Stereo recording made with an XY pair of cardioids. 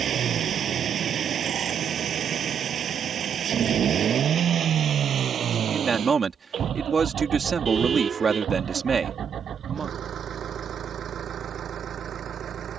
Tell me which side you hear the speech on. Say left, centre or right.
right.